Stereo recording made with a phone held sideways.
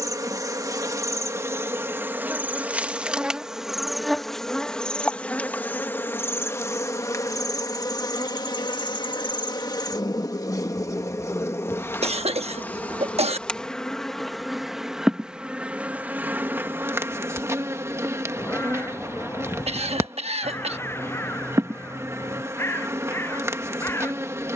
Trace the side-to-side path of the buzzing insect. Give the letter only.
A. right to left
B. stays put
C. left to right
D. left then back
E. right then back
D.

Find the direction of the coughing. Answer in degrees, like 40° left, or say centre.
50° right.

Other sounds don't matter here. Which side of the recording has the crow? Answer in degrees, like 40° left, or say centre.
20° left.